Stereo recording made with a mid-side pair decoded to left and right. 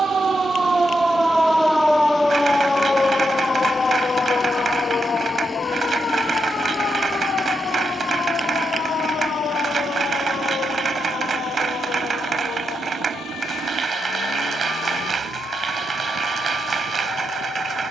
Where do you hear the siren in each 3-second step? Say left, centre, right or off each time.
centre, left, left, left, left, left.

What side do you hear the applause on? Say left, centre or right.
right.